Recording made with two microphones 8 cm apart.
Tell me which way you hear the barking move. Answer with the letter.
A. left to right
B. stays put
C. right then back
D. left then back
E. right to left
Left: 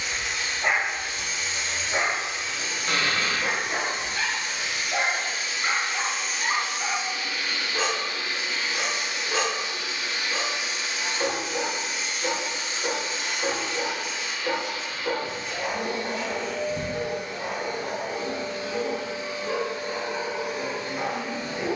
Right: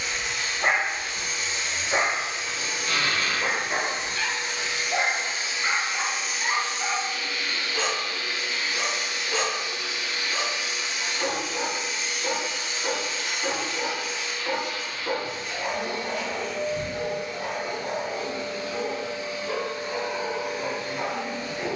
E.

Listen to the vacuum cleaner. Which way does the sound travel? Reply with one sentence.
You can hear the vacuum cleaner go from the right side to the left.